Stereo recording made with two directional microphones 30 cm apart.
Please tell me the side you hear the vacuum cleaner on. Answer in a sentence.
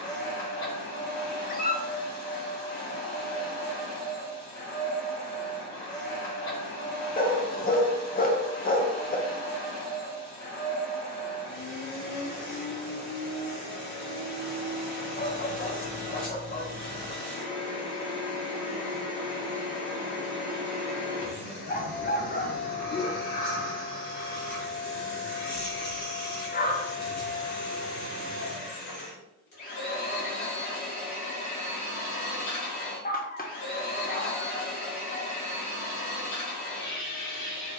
You can hear the vacuum cleaner on the left.